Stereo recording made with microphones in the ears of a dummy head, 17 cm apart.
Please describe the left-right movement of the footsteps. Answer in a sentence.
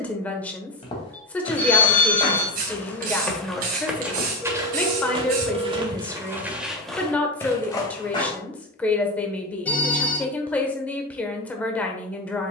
You can hear the footsteps go right and come back.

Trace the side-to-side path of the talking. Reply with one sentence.
You can hear the talking stay put.